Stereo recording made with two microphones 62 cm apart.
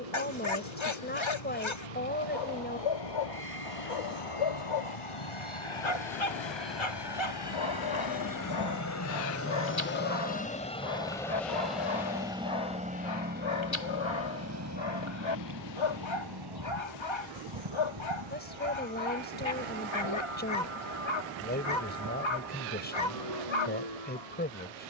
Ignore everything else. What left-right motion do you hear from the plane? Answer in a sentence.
In this clip you hear the plane move to the right.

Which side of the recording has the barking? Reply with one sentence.
In this clip you hear the barking on the left.